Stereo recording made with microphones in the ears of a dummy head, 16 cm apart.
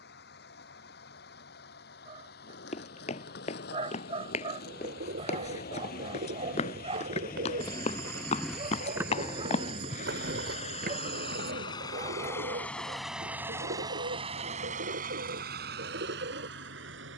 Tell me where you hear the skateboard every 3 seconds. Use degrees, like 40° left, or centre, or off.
70° left, 60° left, 30° left, 40° right, off, off.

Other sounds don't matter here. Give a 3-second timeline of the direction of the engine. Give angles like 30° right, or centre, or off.
60° left, 60° left, 50° left, 40° left, 10° right, 60° right.